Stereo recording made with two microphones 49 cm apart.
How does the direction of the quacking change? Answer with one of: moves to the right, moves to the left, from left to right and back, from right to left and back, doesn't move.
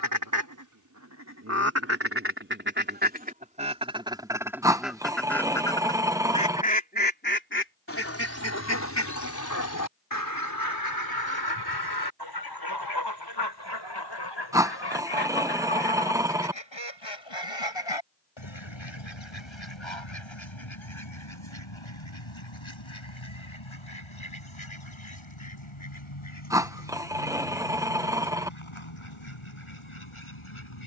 moves to the left.